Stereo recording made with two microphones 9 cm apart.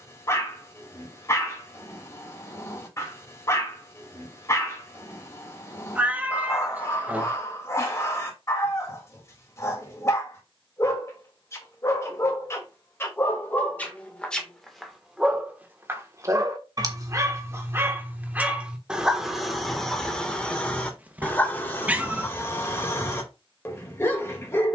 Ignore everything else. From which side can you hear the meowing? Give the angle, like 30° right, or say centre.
20° right.